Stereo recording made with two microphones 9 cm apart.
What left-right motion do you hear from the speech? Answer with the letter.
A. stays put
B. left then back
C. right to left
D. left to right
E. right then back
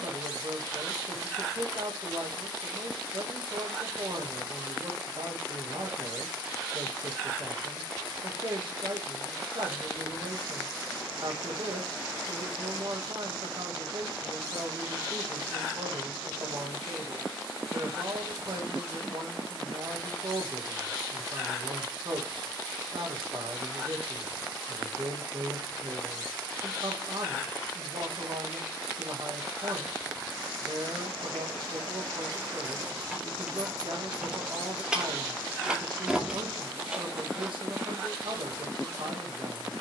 A.